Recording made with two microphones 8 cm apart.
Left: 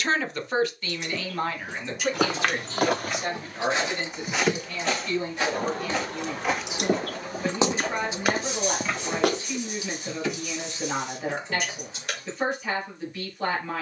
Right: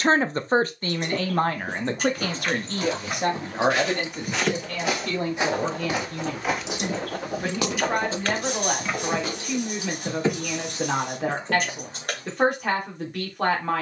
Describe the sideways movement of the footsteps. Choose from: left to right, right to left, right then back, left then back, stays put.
right then back.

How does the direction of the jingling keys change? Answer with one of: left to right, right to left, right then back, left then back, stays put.
left then back.